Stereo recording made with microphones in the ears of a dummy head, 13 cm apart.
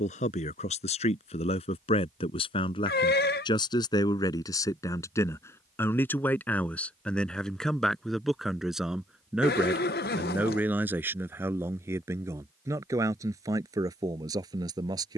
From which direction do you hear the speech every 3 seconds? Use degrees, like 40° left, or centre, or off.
40° left, 30° left, centre, 10° right, 20° right.